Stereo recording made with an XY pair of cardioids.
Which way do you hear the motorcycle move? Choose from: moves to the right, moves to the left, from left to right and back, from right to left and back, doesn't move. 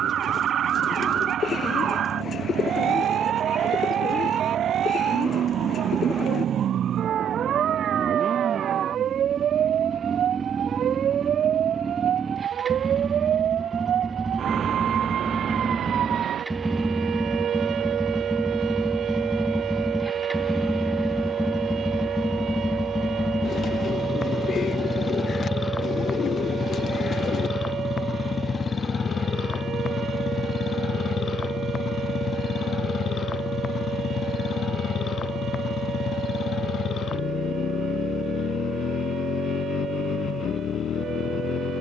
moves to the left.